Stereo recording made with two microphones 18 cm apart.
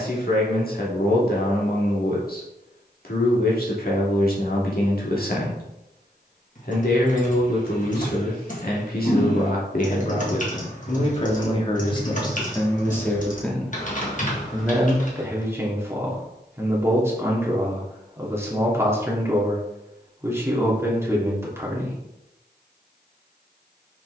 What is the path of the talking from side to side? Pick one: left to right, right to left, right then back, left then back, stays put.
left to right.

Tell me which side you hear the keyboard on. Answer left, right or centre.
left.